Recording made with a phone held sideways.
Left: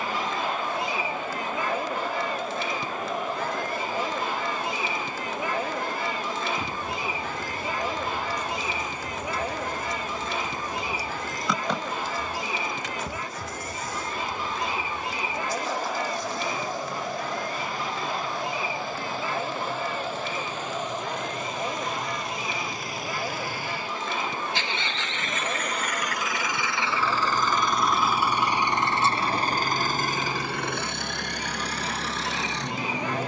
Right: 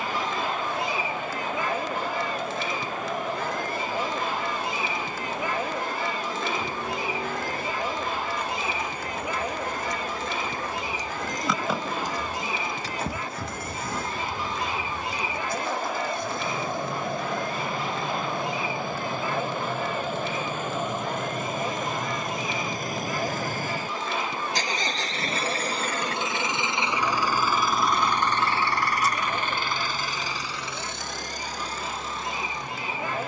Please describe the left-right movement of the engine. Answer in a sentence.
You can hear the engine travel towards the left.